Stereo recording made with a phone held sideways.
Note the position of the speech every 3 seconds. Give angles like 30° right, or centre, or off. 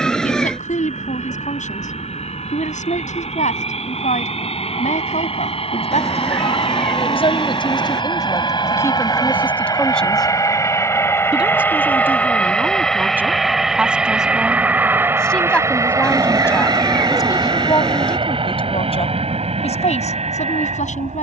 60° left, 60° left, 30° left, centre, 10° right, 20° left, 50° left.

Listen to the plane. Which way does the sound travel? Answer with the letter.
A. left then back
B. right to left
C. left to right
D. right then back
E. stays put
C.